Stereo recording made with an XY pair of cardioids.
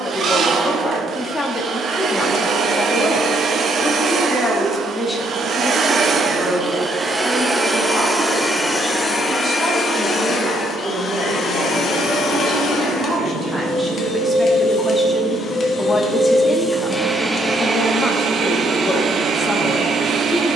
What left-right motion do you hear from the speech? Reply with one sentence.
You can hear the speech move from left to right and back again.